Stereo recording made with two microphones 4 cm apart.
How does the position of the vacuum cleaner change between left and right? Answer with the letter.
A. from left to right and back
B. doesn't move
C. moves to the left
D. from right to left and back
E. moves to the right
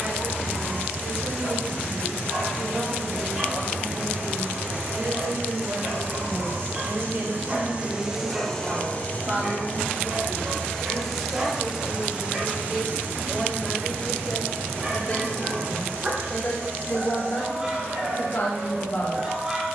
D.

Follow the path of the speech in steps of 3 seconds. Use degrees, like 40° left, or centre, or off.
50° right, 50° right, 40° right, 20° right, 20° left, 40° left, 50° left.